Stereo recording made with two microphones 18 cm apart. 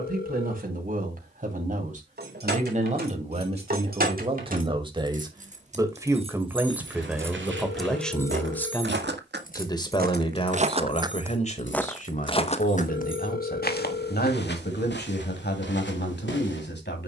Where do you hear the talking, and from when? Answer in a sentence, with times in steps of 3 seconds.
You can hear the talking on the right from 0 s, in the centre from 6 s and on the left from 9 s.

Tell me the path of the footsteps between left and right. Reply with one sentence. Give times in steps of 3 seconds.
You can hear the footsteps not at all from 0 s, on the right from 6 s and on the left from 12 s.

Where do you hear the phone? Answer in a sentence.
You can hear the phone on the left.